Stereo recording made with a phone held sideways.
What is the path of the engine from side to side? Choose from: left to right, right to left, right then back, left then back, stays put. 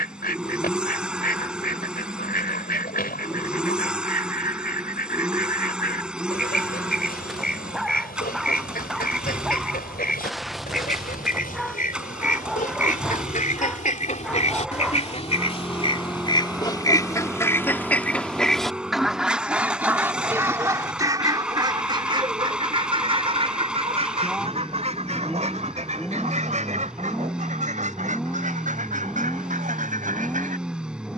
stays put.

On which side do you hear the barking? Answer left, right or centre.
centre.